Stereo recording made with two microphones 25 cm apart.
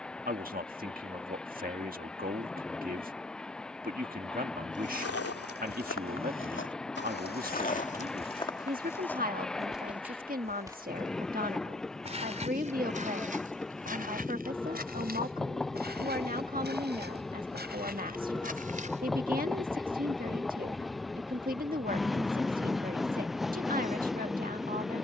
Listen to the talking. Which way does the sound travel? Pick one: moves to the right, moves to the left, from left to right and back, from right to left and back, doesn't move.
doesn't move.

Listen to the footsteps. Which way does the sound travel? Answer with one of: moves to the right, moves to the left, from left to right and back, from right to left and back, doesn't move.
moves to the right.